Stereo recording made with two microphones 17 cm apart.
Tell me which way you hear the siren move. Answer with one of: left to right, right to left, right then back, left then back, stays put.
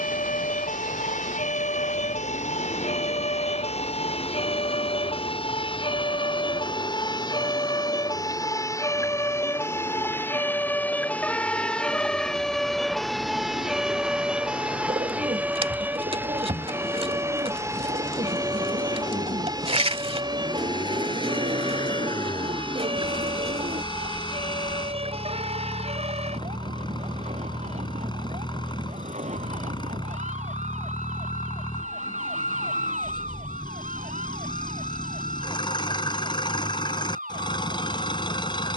left to right.